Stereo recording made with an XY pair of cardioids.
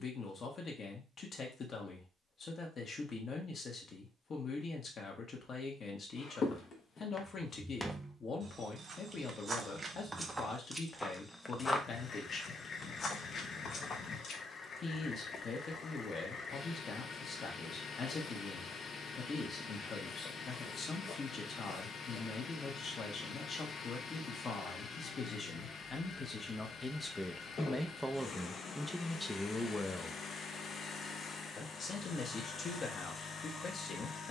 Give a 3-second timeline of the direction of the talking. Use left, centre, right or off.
left, left, left, left, left, left, left, left, left, centre, left, left.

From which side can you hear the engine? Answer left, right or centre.
left.